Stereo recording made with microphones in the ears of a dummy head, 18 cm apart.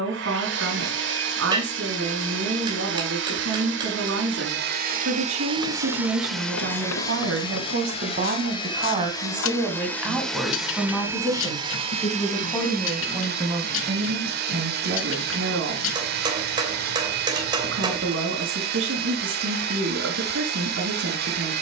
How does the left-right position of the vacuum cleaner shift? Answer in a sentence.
In this clip you hear the vacuum cleaner move from right to left and back again.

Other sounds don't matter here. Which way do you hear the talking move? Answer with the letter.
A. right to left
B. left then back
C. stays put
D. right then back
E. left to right
B.